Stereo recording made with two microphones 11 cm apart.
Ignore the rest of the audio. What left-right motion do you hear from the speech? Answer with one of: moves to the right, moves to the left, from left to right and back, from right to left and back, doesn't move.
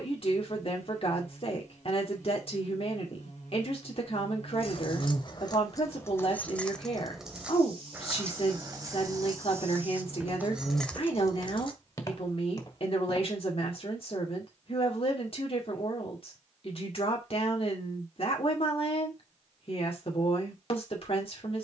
doesn't move.